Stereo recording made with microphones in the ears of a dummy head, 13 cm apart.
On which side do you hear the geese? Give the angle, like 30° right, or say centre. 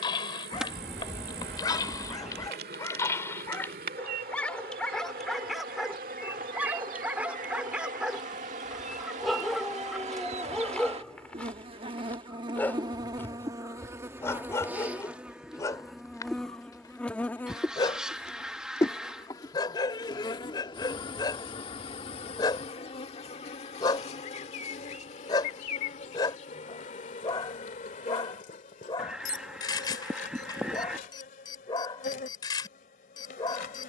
centre.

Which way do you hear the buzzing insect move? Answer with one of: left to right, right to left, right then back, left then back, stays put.
right to left.